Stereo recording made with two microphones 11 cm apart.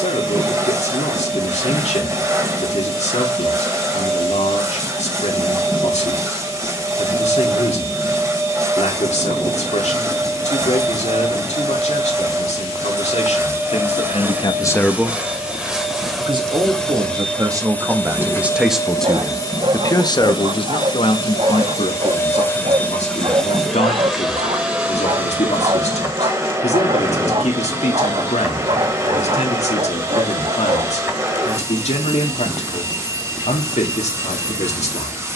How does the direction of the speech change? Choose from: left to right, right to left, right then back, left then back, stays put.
right then back.